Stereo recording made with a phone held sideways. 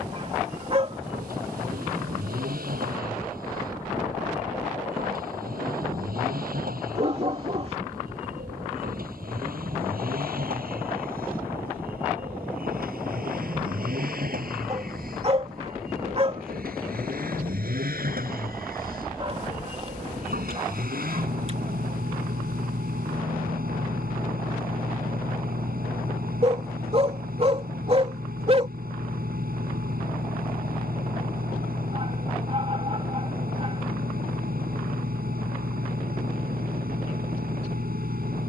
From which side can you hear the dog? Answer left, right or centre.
right.